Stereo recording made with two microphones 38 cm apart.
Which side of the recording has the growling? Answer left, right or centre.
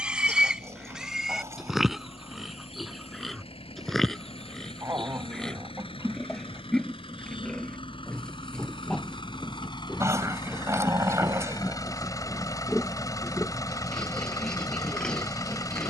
centre.